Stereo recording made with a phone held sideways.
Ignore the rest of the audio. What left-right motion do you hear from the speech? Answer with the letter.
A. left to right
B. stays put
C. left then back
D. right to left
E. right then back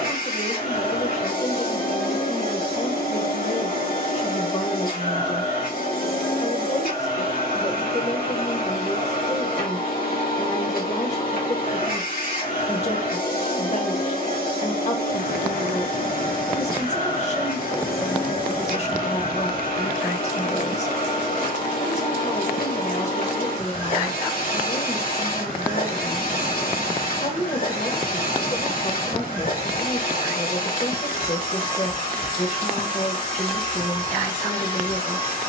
B.